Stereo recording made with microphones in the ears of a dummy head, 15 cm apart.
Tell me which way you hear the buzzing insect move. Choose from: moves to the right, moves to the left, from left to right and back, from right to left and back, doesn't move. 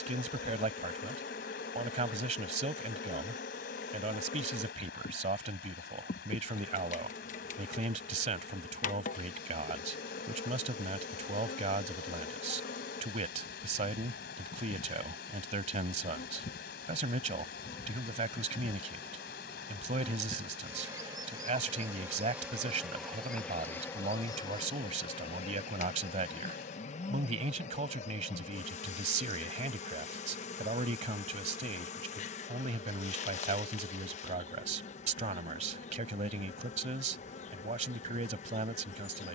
from left to right and back.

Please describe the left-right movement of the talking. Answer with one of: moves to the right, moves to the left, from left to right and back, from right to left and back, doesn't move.
doesn't move.